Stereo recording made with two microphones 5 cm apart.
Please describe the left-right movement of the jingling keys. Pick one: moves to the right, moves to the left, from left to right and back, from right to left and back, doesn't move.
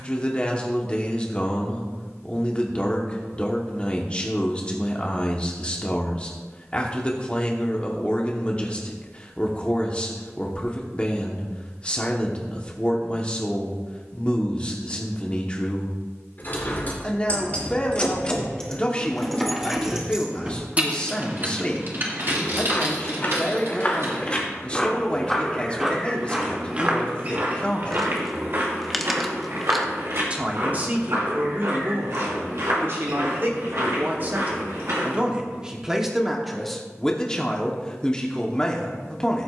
moves to the right.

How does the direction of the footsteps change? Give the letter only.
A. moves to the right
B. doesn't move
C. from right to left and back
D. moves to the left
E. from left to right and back
A.